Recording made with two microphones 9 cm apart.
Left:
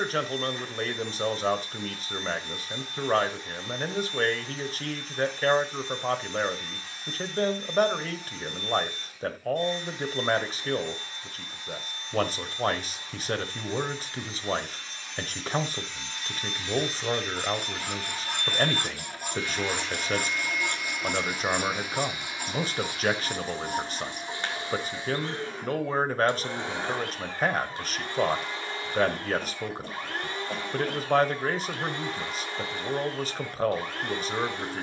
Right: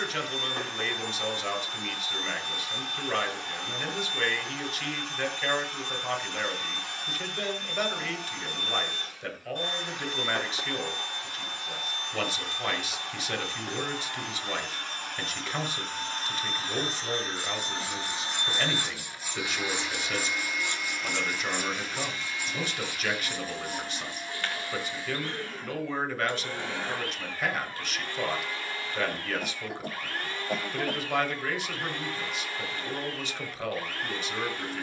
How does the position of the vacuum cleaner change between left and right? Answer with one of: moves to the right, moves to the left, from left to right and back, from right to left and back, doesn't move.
moves to the left.